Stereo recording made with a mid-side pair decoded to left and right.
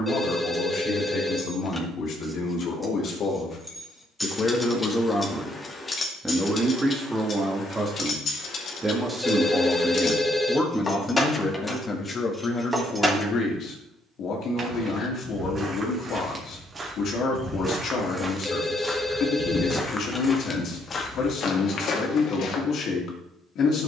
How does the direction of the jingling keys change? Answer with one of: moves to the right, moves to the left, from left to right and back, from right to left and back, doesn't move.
from right to left and back.